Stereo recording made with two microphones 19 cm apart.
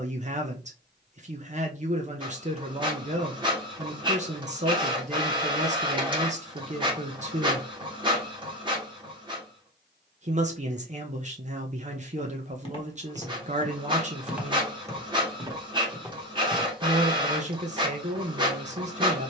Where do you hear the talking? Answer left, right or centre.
right.